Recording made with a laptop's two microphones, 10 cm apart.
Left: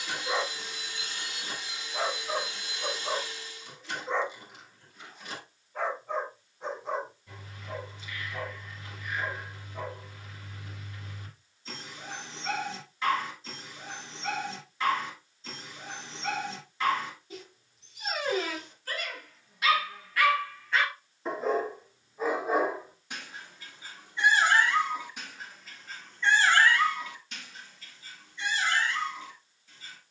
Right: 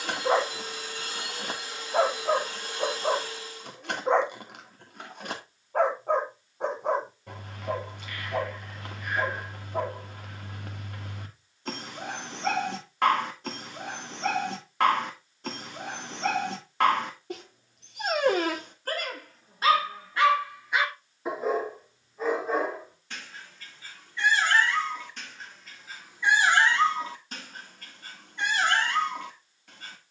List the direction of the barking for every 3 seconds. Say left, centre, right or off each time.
right, right, right, right, right, right, right, centre, centre, right.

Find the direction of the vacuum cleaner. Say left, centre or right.
right.